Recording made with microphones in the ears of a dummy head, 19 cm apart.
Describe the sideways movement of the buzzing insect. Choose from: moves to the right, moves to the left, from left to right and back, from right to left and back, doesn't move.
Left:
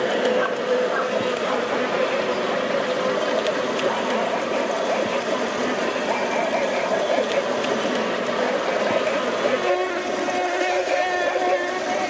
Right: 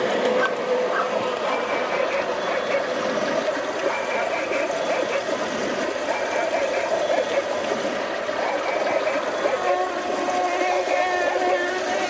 from right to left and back.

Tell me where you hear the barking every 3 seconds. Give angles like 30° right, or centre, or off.
50° right, 30° right, centre, 20° left.